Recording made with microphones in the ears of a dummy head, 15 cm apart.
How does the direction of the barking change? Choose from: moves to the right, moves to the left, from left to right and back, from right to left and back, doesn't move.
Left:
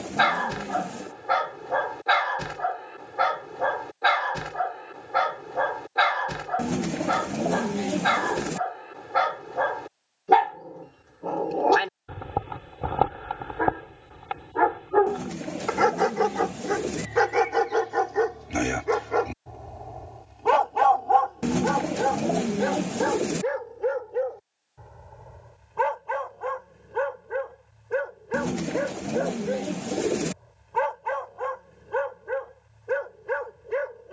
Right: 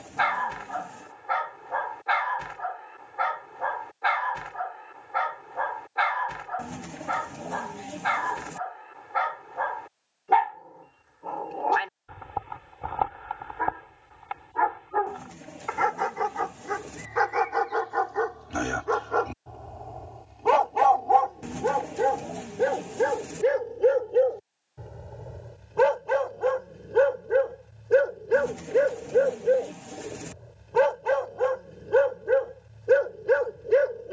moves to the right.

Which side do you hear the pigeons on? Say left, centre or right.
left.